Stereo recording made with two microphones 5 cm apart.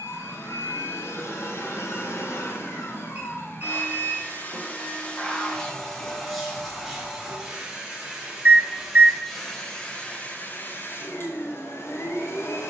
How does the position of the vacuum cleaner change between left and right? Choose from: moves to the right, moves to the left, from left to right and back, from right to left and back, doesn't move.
from left to right and back.